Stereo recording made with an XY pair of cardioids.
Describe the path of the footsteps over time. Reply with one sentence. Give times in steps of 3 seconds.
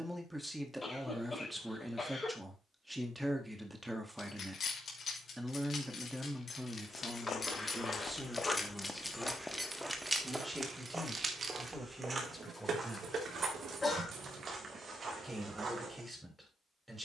You can hear the footsteps not at all from 0 s, on the left from 6 s, in the centre from 9 s and on the right from 12 s.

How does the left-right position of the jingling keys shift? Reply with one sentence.
You can hear the jingling keys move to the right.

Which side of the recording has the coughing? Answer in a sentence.
In this clip you hear the coughing on the left.